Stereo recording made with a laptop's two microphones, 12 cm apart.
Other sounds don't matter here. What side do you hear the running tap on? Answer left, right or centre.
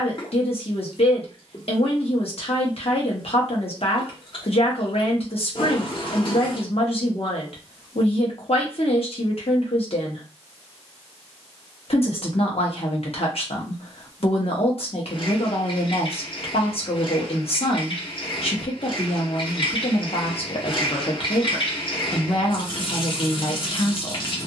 left.